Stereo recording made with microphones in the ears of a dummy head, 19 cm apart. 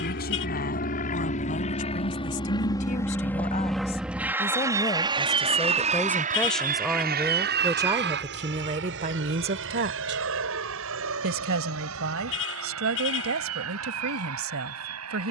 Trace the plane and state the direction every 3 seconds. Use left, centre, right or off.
left, centre, right, right, right.